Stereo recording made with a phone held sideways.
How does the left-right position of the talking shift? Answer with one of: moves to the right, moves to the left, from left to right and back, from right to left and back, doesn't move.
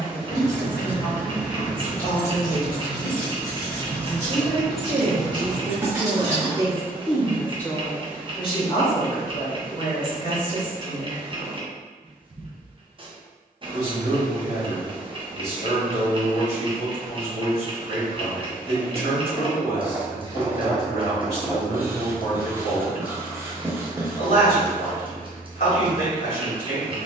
from left to right and back.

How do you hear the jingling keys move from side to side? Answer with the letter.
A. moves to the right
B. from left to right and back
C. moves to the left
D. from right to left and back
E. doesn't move
D.